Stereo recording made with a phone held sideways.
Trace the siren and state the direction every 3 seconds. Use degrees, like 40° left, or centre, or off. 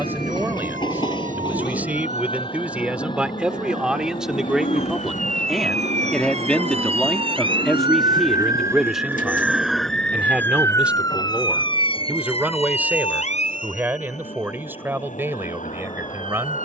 70° right, 60° right, 40° right, 10° left, 50° left, 70° left.